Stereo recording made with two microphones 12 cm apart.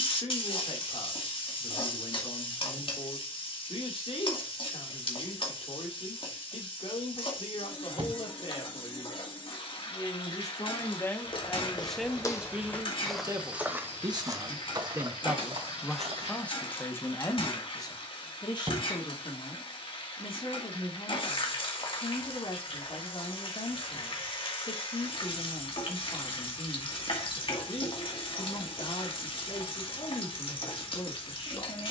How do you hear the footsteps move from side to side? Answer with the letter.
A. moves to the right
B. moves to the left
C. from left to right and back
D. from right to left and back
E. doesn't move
A.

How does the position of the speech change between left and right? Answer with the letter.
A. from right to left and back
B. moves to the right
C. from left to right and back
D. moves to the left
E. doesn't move
C.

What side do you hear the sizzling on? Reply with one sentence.
You can hear the sizzling on the left.